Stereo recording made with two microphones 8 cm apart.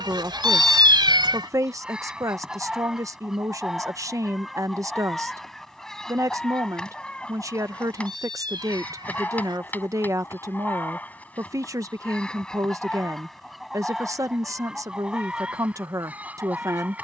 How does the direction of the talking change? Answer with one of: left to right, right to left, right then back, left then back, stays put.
stays put.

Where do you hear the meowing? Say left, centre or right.
right.